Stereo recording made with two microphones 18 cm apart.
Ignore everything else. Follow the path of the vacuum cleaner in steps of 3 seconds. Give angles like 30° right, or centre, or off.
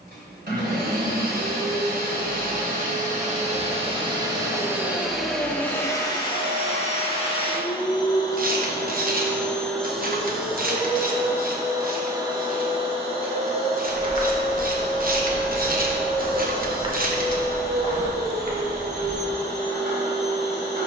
60° right, 20° right, 30° left, centre, 30° right, 50° right, 60° right.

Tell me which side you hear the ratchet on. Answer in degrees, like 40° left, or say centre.
50° right.